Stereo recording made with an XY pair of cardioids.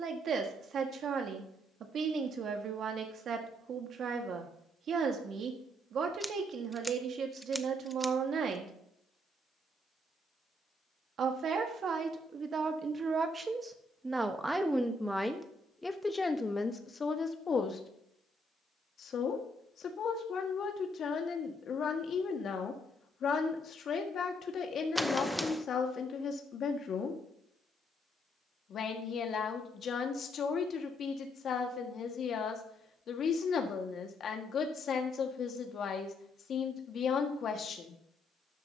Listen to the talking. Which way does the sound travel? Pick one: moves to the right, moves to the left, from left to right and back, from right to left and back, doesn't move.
moves to the left.